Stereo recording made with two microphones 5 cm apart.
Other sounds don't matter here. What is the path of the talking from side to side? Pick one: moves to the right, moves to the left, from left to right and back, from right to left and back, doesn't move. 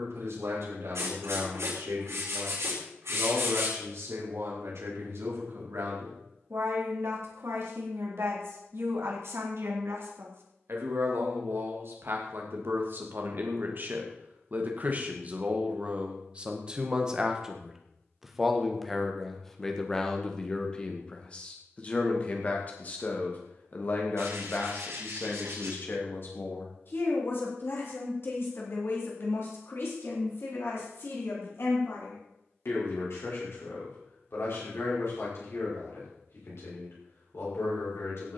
moves to the left.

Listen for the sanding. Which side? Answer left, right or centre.
right.